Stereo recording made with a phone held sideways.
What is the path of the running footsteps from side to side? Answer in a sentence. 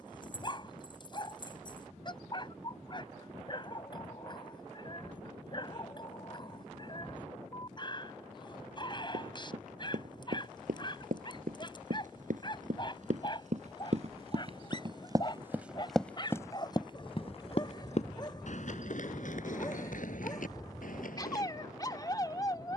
In this clip you hear the running footsteps travel towards the left.